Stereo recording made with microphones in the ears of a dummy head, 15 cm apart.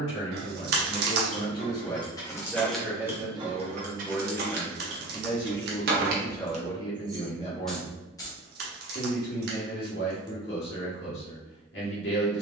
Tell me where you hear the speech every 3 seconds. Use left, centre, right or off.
left, centre, left, left.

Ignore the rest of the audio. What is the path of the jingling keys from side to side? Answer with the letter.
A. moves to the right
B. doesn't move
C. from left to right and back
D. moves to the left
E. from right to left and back
C.